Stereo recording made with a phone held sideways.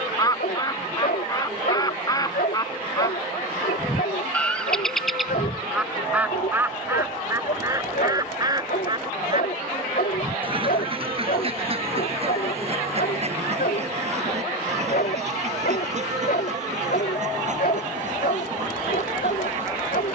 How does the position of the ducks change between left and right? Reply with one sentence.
You can hear the ducks move from left to right.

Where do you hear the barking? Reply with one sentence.
In this clip you hear the barking on the left.